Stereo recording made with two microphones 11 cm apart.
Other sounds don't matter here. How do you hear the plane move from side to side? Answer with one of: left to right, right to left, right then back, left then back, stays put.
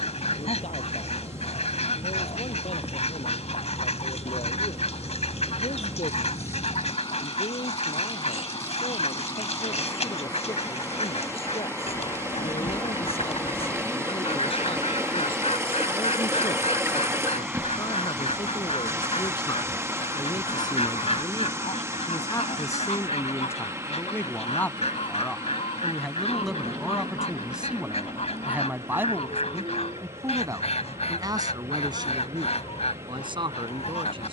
left to right.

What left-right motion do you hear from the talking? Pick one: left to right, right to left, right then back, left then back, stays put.
left to right.